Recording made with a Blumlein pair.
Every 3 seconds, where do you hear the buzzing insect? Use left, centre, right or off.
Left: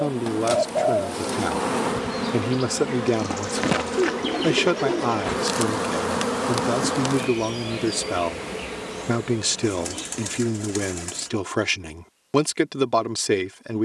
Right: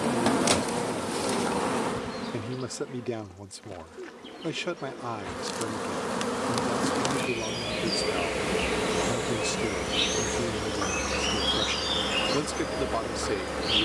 centre, left, centre, right, right.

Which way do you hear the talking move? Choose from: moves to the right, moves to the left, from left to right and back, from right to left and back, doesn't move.
doesn't move.